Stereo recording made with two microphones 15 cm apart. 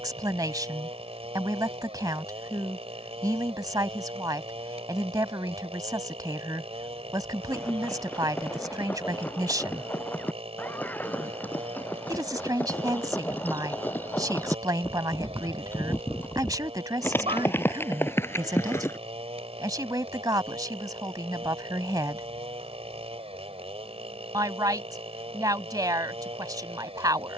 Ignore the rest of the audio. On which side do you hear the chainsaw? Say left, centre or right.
right.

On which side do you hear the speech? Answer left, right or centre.
right.